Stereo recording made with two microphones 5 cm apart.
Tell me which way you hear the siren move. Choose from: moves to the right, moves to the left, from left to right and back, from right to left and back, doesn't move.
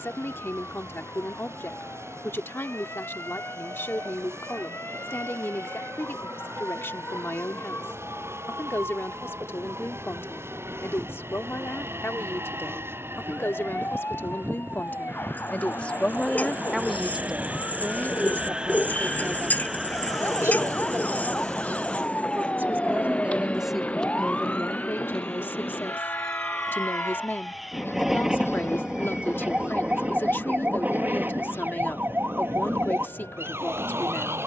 moves to the right.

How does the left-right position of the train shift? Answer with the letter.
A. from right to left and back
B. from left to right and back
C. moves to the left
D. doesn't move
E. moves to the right
C.